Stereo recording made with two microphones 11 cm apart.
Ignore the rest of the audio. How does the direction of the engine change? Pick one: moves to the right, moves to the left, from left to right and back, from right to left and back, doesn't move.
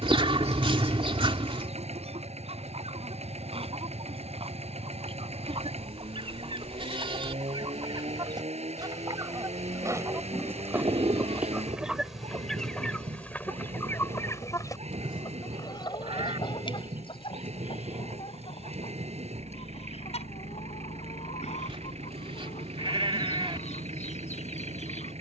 doesn't move.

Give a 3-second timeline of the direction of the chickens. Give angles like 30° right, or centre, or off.
60° right, 50° right, 40° right, 20° right, 10° left, 50° left, 60° left, 70° left, 70° left.